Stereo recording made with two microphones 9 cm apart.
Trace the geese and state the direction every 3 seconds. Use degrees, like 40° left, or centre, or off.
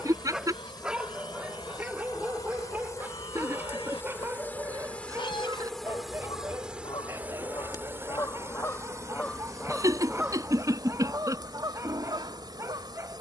80° left, 70° left, 50° left, 20° right, 60° right.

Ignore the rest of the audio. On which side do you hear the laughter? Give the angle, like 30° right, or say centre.
40° right.